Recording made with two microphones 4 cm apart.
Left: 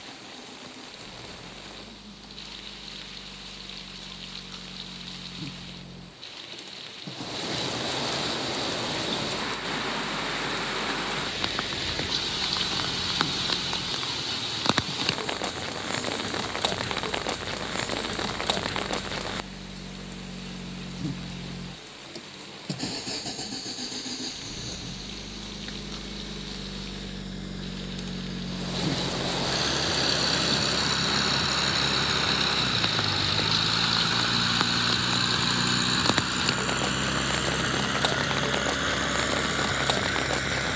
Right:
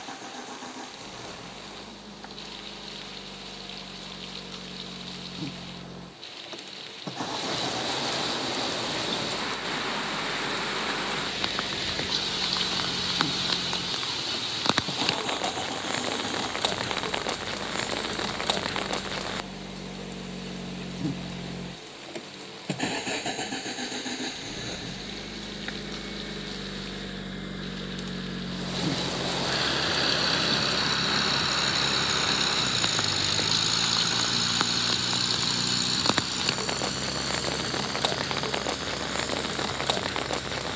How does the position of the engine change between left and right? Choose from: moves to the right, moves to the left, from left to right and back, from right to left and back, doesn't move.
moves to the left.